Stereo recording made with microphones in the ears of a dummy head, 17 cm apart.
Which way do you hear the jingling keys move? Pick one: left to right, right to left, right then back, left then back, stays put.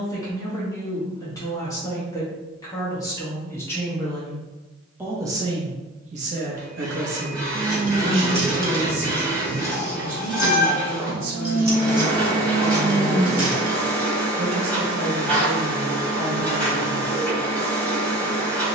left then back.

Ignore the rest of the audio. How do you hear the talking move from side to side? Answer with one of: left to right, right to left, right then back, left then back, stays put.
left to right.